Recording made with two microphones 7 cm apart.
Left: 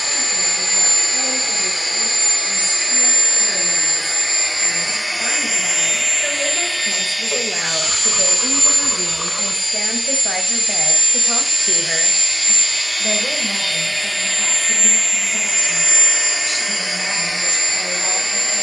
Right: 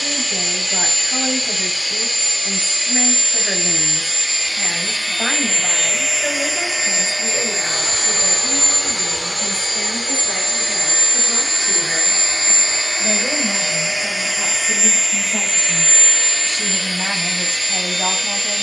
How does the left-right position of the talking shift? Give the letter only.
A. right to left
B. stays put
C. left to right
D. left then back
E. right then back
D.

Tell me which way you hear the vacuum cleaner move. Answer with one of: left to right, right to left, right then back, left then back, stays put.
right then back.